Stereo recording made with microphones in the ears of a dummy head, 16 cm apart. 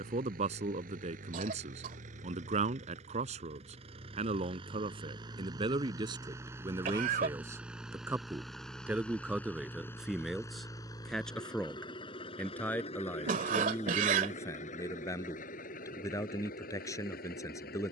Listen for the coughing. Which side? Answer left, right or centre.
right.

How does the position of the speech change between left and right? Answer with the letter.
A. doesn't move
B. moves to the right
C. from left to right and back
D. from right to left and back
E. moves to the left
E.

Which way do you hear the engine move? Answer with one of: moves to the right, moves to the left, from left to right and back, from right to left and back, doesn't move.
moves to the left.